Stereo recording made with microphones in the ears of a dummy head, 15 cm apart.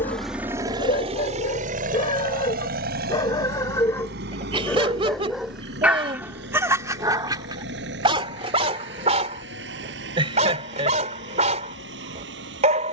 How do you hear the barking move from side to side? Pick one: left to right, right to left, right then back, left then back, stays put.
left to right.